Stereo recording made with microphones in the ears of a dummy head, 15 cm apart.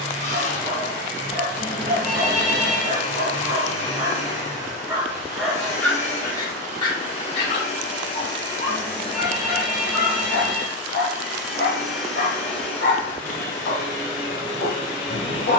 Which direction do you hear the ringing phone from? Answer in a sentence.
In this clip you hear the ringing phone in the centre.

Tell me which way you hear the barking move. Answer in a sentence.
In this clip you hear the barking travel towards the left.